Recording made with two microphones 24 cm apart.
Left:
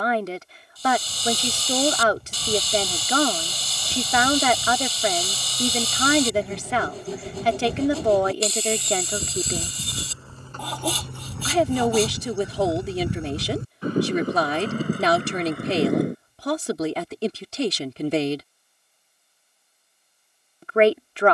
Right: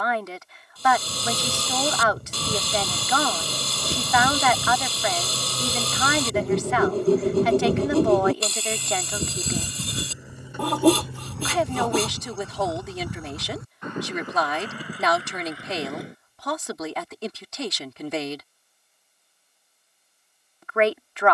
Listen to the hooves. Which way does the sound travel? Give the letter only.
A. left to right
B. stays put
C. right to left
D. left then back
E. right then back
C.